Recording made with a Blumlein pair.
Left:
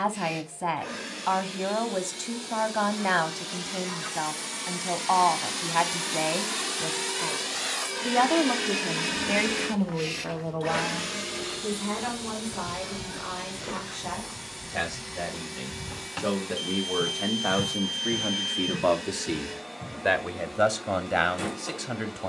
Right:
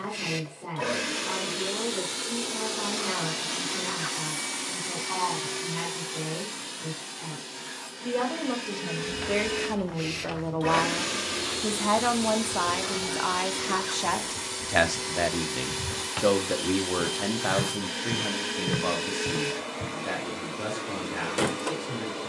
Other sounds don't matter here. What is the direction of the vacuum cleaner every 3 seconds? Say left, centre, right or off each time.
right, centre, left, centre, right, right, right, right.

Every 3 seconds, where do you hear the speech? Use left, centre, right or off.
left, left, left, centre, right, centre, left, left.